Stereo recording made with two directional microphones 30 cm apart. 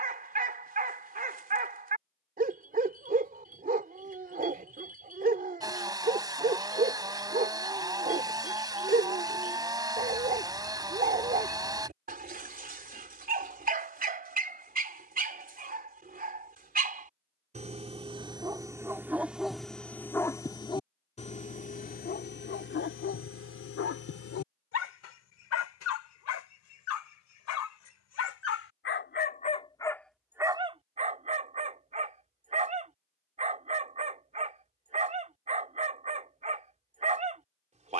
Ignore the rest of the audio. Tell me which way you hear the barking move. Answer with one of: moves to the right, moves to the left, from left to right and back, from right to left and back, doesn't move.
from right to left and back.